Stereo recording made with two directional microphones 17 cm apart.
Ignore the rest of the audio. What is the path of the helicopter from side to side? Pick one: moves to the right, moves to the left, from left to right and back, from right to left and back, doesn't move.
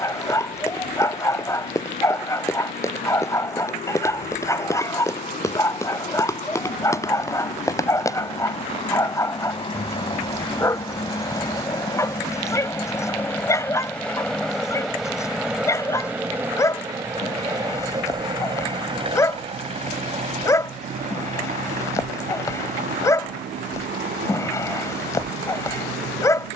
moves to the right.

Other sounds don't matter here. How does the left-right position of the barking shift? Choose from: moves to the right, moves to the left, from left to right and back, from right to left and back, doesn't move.
doesn't move.